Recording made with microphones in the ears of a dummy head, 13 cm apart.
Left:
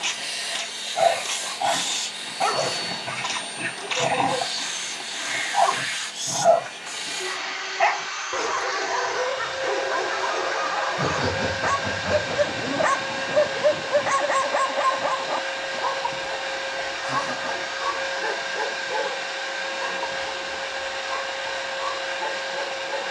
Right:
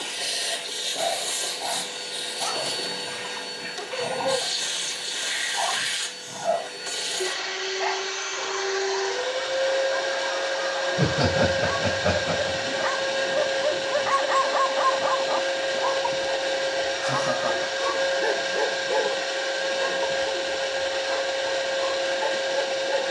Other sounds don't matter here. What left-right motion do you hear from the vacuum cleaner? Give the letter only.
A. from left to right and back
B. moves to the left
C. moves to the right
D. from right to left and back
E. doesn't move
E.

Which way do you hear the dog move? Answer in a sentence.
In this clip you hear the dog go from the left side to the right.